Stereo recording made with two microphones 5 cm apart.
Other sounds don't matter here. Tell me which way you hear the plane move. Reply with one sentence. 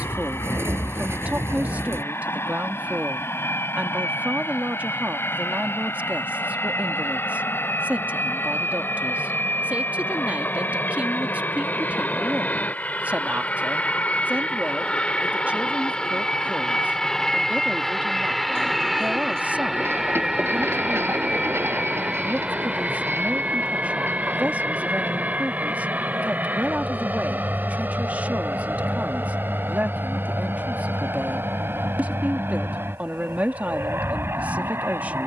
In this clip you hear the plane go from the left side to the right.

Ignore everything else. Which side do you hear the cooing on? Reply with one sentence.
In this clip you hear the cooing on the right.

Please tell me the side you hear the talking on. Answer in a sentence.
You can hear the talking on the right.